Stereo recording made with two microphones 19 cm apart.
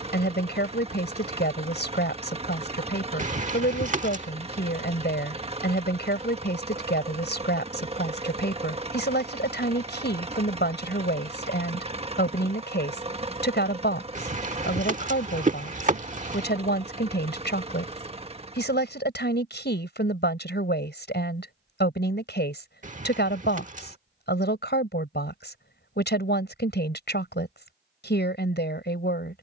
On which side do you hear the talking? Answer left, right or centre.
left.